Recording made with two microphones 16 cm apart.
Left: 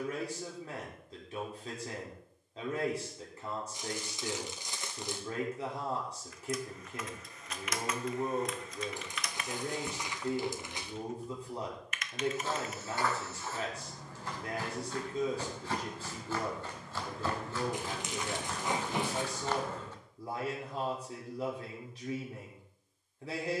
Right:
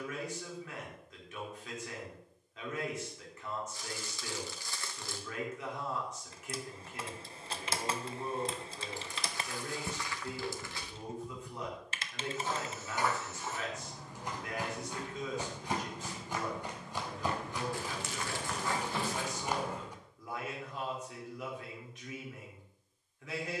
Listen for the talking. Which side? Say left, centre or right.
left.